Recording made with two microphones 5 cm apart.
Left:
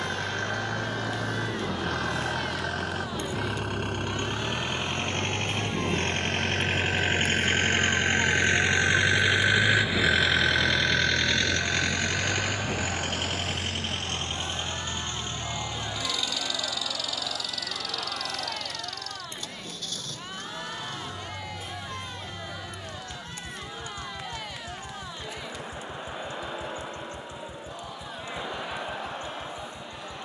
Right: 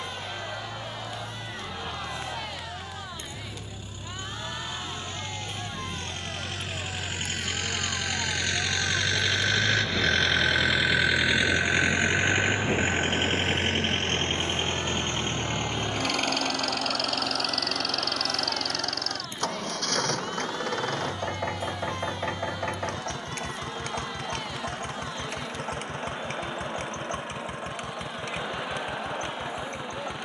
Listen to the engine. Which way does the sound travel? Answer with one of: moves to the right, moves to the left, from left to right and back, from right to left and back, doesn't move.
moves to the right.